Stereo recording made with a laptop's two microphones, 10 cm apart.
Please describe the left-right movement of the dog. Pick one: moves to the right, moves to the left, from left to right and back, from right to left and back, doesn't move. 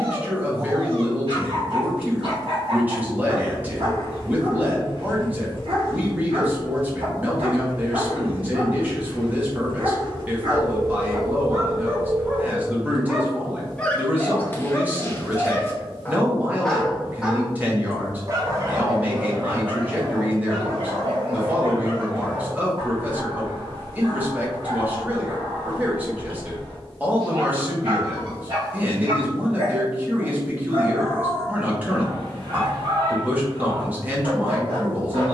from right to left and back.